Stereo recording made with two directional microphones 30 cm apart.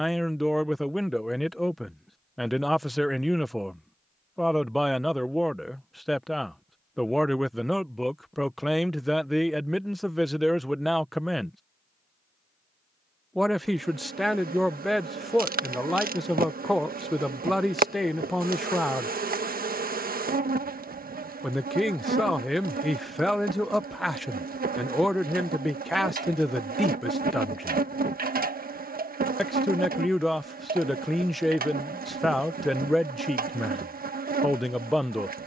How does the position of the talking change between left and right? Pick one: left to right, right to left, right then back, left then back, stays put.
stays put.